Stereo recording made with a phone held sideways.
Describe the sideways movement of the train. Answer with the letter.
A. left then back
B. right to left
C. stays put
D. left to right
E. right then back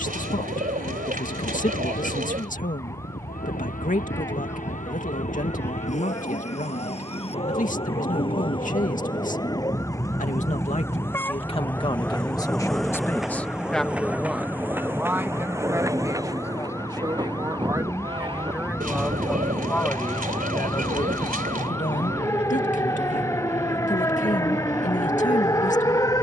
D.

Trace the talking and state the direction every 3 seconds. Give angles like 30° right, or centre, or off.
50° left, 50° left, 50° left, 40° left, 10° left, 20° right, centre, 50° left, 50° left.